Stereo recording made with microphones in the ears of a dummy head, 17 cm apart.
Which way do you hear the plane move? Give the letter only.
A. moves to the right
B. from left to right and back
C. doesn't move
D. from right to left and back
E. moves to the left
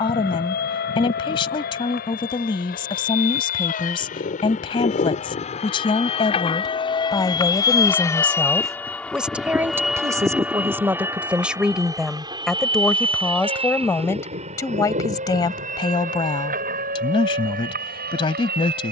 A.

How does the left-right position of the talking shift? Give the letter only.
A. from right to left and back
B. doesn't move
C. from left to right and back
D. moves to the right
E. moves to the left
C.